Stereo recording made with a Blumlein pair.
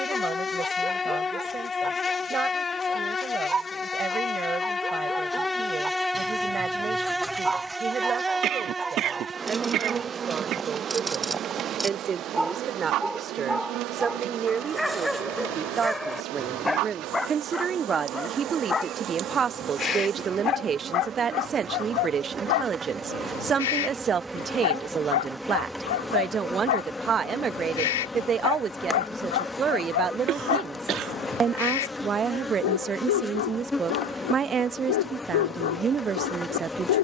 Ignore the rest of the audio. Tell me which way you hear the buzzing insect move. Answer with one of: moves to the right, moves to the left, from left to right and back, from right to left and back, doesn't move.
from left to right and back.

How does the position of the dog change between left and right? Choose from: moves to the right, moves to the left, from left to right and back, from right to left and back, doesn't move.
moves to the left.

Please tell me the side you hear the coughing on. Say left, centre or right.
right.